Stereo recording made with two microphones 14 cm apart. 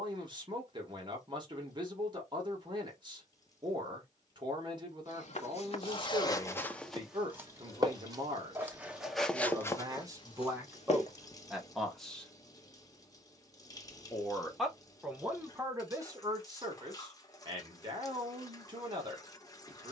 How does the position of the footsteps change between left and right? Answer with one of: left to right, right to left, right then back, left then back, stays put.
right then back.